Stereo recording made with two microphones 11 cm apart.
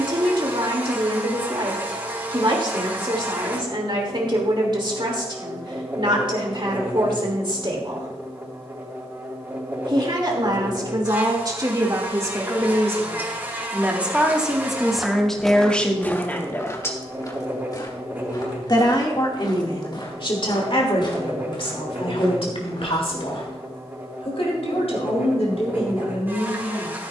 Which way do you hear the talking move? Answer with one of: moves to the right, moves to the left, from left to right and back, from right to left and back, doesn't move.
moves to the left.